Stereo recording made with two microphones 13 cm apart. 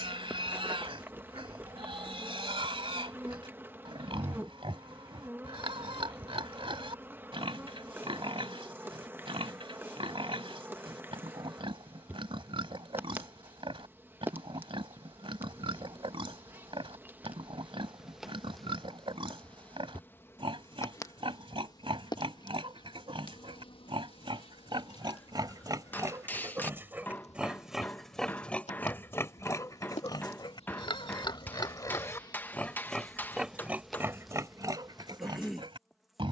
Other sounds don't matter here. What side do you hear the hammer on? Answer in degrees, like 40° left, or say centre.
10° left.